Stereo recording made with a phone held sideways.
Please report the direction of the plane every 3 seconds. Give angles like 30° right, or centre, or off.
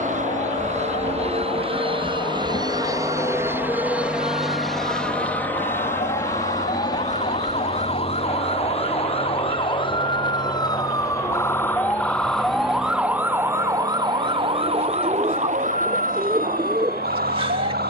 40° right, centre, 30° left, 40° left, 50° left, 50° left.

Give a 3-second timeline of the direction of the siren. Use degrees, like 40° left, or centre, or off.
60° left, 50° left, 40° left, 20° left, 20° right, 60° right.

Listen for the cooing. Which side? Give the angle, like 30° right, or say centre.
30° right.